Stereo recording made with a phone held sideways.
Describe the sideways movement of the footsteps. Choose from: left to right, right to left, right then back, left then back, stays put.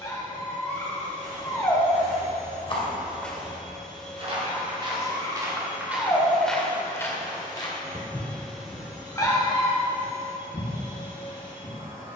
right then back.